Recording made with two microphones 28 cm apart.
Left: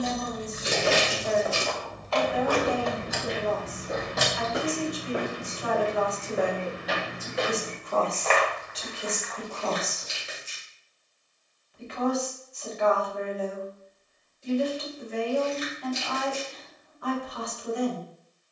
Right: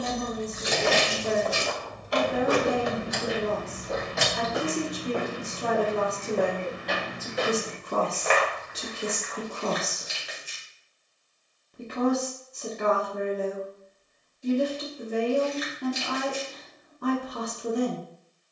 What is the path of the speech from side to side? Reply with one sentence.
In this clip you hear the speech stay in one place.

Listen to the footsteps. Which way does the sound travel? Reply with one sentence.
You can hear the footsteps move from right to left and back again.